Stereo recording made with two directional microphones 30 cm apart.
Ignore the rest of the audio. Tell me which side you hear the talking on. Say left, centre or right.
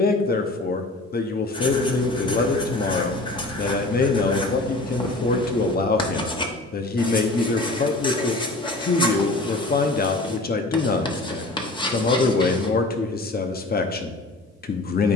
left.